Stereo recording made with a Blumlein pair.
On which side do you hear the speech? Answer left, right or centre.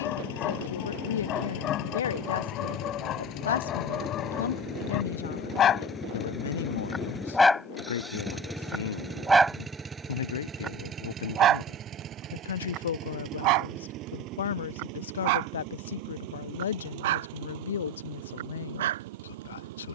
left.